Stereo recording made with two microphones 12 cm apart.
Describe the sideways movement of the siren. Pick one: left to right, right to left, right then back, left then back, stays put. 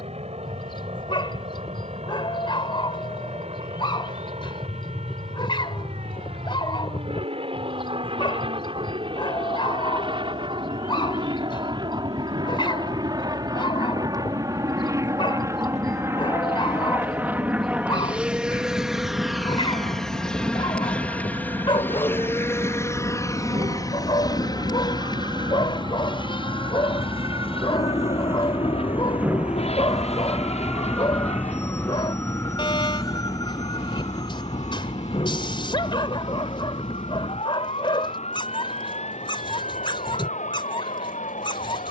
right to left.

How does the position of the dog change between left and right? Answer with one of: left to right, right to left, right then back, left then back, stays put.
stays put.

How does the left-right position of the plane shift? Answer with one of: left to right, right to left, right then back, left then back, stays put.
right to left.